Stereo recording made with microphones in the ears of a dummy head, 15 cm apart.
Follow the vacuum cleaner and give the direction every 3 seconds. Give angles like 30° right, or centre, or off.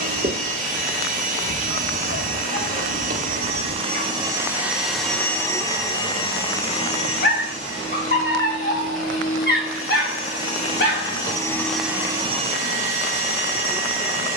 50° right, 10° right, 40° left, 40° left, 40° right.